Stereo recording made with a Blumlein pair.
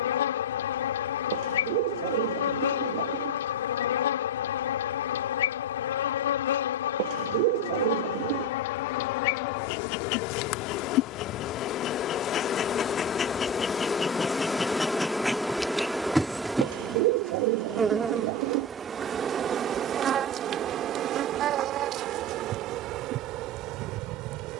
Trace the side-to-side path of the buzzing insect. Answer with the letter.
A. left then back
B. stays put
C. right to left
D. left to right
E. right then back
D.